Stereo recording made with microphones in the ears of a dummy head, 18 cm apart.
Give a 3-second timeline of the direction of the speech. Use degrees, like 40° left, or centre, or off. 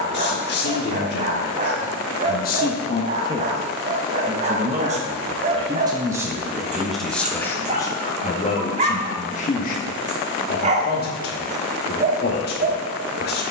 50° left, 20° right, 10° left, 40° left, 50° left.